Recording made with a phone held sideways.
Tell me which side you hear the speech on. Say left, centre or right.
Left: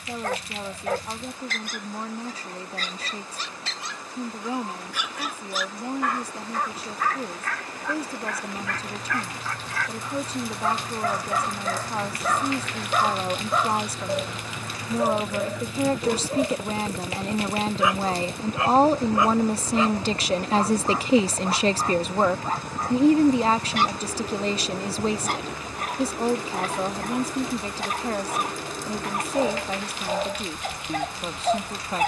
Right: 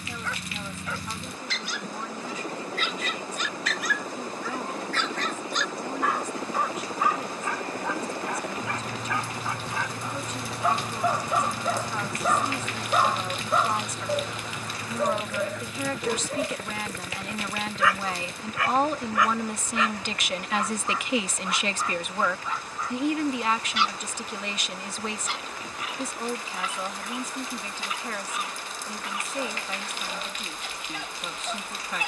left.